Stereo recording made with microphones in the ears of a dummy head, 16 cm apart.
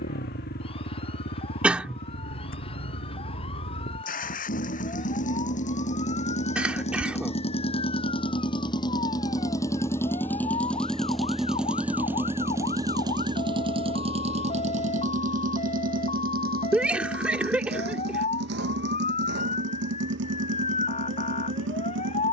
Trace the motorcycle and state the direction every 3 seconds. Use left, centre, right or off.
left, left, left, centre, right, right, right, right.